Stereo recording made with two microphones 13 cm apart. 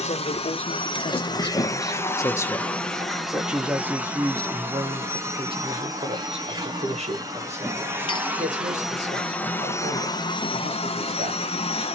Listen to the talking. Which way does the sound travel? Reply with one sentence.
In this clip you hear the talking move from left to right.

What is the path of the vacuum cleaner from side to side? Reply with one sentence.
In this clip you hear the vacuum cleaner move from left to right and back again.